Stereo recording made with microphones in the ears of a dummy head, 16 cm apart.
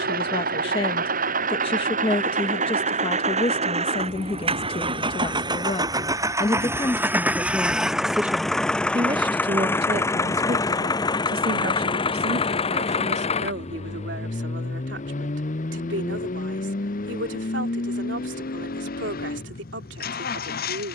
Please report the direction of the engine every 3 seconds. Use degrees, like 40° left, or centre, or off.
50° right, 30° right, 10° right, 20° left, 40° left, 50° left, 60° left.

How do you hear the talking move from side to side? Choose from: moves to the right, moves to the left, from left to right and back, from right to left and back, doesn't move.
moves to the right.